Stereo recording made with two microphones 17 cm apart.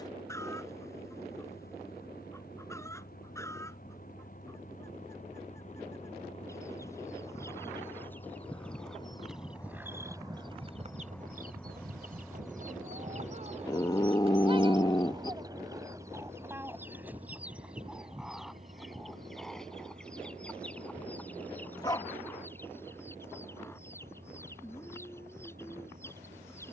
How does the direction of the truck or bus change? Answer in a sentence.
You can hear the truck or bus move to the right.